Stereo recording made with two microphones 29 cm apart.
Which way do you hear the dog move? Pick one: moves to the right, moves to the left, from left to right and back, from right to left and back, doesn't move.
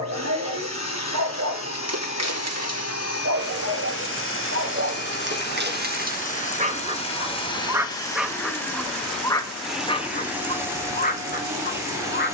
moves to the left.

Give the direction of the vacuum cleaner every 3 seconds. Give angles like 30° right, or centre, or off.
50° left, 40° left, 20° left, 10° right.